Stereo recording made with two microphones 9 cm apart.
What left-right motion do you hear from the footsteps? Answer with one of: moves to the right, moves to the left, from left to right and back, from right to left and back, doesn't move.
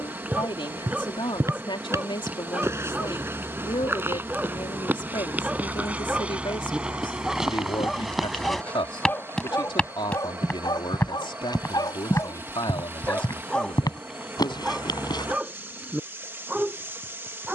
moves to the left.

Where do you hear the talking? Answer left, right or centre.
left.